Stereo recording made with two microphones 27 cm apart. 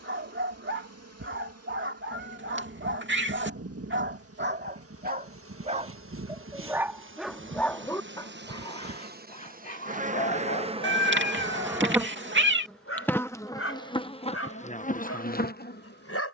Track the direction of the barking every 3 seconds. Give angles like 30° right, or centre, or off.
50° right, 40° right, 10° left, 30° left, 60° left, 60° left.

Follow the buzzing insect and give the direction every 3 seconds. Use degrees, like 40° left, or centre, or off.
60° right, 60° right, 50° right, 20° right, 10° left, 40° left.